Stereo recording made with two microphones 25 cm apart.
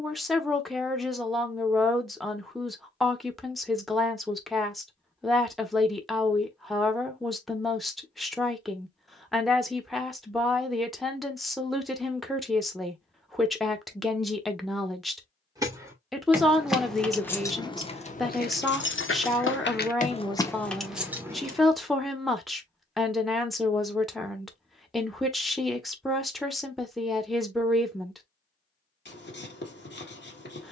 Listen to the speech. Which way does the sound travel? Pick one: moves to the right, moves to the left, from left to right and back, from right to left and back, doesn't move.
doesn't move.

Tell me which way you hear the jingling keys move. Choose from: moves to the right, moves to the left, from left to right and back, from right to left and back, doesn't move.
from right to left and back.